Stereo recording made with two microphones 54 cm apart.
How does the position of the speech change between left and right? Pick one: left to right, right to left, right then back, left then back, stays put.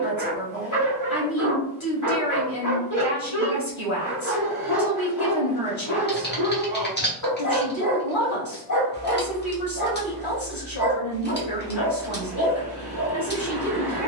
stays put.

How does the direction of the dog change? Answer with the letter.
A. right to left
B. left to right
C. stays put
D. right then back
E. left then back
C.